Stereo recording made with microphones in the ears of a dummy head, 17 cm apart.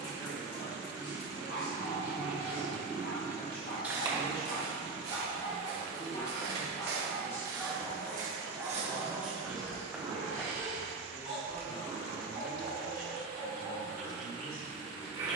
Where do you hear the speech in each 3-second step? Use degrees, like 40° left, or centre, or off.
40° left, 30° left, 10° left, 20° left, 40° left.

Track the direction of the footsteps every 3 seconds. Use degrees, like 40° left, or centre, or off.
off, 50° right, 50° right, 10° right, off.